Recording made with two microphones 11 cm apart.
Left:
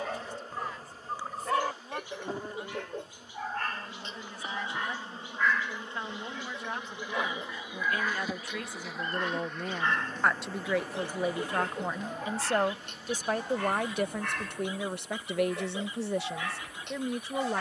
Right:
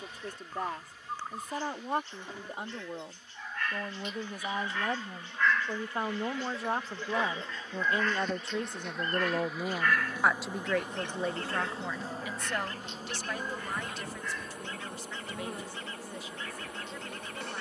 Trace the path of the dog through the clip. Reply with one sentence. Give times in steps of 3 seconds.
You can hear the dog on the left from 0 s, in the centre from 6 s and on the left from 9 s.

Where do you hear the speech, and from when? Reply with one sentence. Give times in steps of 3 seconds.
In this clip you hear the speech on the right from 0 s, in the centre from 9 s and on the left from 12 s.